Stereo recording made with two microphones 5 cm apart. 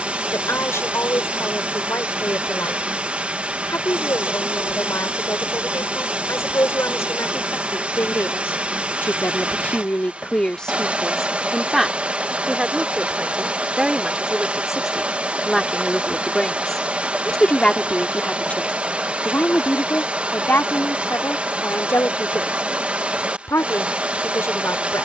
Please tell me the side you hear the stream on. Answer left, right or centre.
right.